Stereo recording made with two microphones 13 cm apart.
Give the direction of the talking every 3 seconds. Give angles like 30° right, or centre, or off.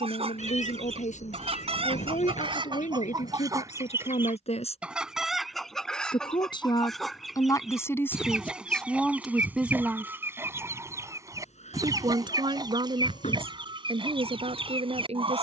70° left, 60° left, 20° left, 10° right, 50° right.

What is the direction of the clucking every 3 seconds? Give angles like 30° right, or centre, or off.
50° right, 10° right, centre, 20° right, 40° right.